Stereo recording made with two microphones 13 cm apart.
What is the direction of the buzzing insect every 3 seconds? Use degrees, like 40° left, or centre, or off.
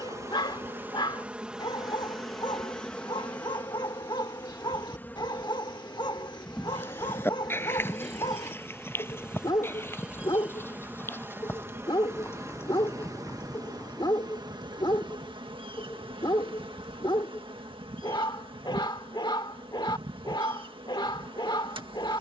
10° right, 10° left, centre, 10° right, 30° right, 40° right, 40° right, 40° right.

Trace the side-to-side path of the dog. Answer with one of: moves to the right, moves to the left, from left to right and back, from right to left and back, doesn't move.
doesn't move.